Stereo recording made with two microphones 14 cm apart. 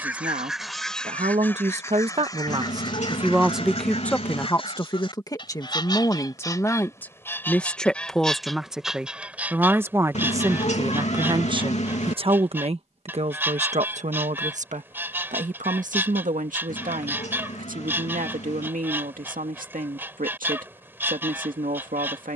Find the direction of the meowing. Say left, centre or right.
left.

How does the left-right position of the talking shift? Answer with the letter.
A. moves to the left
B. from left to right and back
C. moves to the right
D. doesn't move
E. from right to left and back
E.